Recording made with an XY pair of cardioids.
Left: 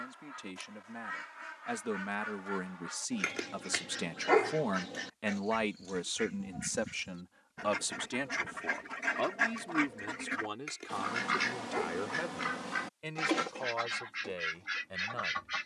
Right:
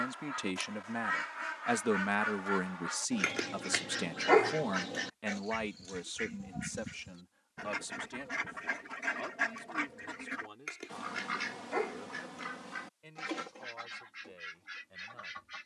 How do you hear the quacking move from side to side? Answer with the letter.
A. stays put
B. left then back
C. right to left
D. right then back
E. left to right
C.